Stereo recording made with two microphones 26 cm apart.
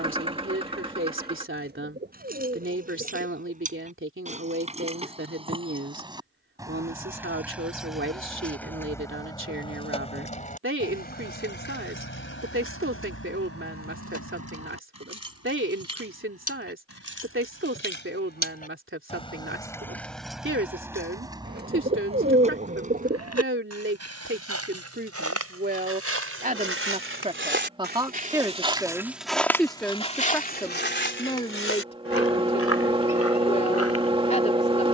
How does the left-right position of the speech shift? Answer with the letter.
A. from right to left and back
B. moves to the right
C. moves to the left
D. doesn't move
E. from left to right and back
C.